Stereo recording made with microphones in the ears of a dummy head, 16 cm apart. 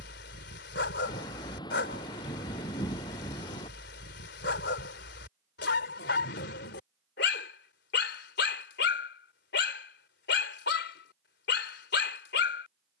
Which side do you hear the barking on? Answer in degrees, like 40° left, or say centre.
70° left.